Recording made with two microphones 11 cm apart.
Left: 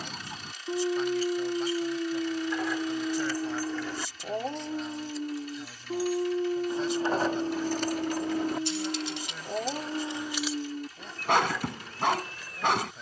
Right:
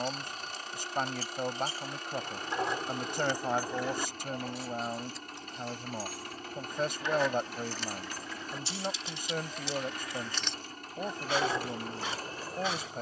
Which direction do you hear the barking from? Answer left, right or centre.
left.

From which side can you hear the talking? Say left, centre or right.
right.